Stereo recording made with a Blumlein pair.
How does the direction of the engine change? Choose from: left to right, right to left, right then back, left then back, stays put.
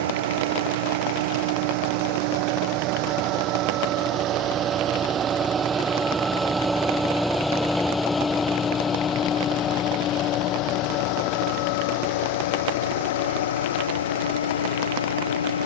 right to left.